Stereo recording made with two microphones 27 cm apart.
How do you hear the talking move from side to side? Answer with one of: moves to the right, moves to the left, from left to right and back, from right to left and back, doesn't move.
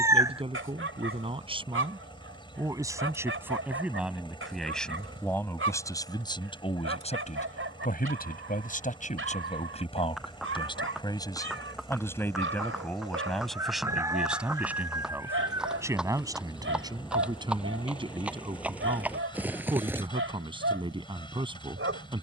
from right to left and back.